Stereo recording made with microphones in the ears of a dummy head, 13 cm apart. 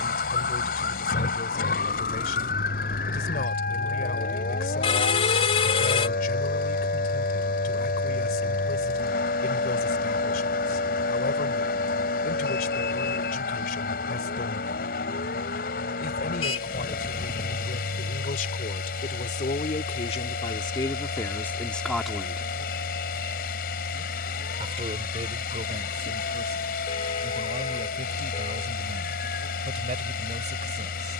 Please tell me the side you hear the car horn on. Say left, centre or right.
left.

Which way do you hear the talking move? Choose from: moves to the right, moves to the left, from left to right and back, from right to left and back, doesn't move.
moves to the right.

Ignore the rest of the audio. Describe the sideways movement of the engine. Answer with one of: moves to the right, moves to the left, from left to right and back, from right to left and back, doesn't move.
doesn't move.